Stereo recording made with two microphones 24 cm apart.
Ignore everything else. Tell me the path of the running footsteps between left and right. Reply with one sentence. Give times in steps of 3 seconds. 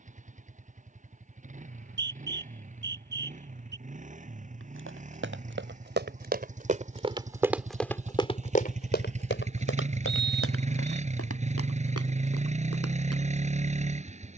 You can hear the running footsteps not at all from 0 s, on the right from 3 s, in the centre from 6 s and on the left from 9 s.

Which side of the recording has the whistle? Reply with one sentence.
In this clip you hear the whistle on the right.